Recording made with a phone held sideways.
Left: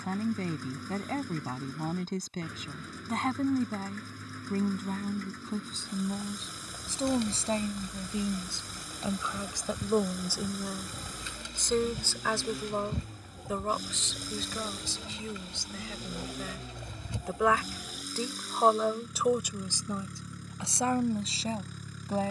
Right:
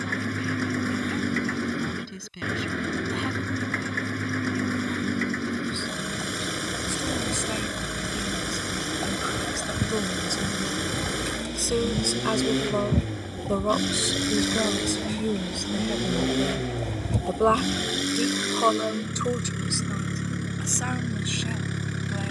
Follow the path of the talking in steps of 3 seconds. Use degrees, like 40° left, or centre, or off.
40° left, 40° left, 30° left, 10° left, 30° right, 40° right, 10° left, 40° left.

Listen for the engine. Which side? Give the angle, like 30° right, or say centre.
80° right.